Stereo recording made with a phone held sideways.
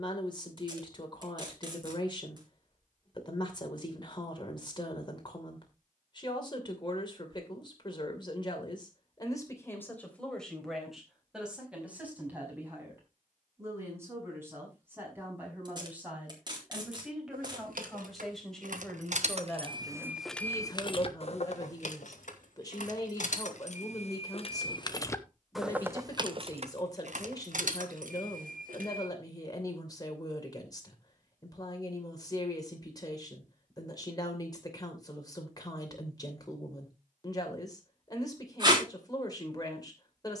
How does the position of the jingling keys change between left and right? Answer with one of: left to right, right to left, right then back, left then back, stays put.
left then back.